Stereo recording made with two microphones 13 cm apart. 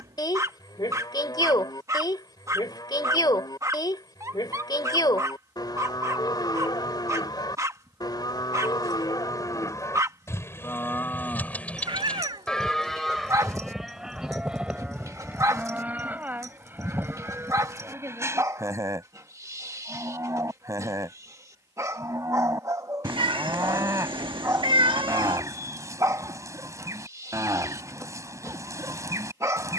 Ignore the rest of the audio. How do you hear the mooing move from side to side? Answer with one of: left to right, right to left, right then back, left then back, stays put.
left to right.